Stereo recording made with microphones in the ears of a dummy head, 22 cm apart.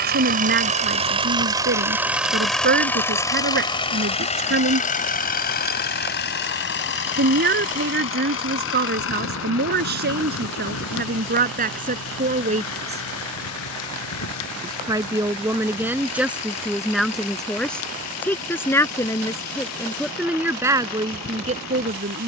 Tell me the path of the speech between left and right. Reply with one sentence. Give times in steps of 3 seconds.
In this clip you hear the speech on the right from 0 s, in the centre from 15 s and on the right from 21 s.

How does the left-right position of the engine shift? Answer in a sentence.
In this clip you hear the engine go from the right side to the left.